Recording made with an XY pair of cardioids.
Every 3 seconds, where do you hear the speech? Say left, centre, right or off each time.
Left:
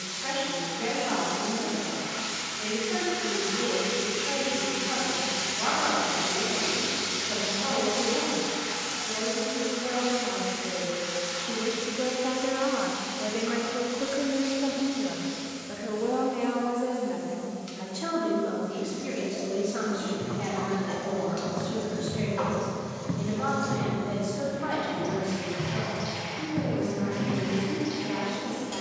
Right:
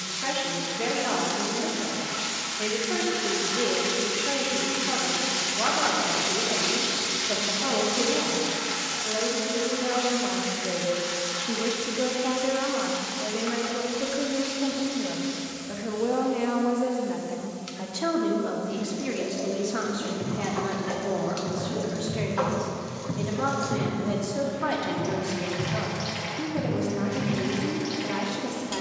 right, right, right, right, centre, right, right, right, right, right.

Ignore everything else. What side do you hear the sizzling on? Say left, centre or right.
right.